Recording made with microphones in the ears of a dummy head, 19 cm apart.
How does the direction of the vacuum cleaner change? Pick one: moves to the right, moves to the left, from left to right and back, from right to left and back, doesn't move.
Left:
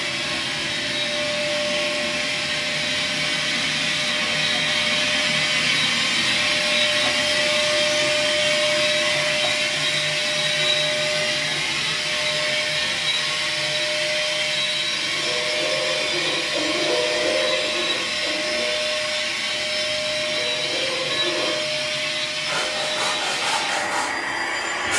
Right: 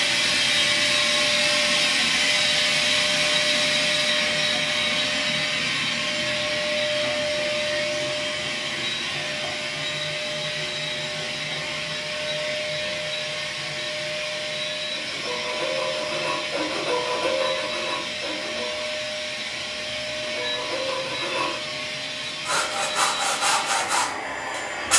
moves to the left.